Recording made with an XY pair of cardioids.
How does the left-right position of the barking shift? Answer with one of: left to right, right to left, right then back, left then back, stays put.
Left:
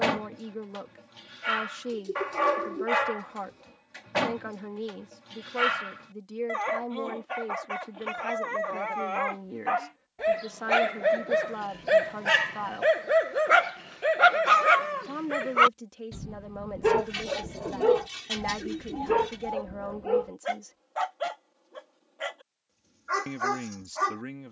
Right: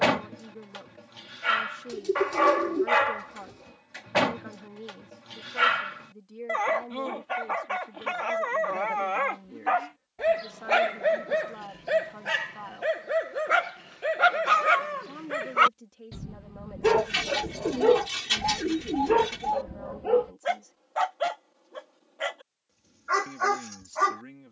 left then back.